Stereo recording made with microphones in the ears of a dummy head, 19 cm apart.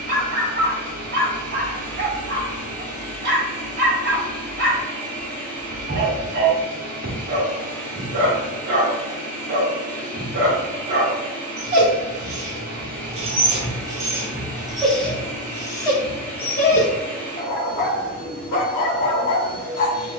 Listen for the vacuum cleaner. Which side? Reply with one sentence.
In this clip you hear the vacuum cleaner in the centre.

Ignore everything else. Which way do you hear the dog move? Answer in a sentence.
In this clip you hear the dog travel towards the left.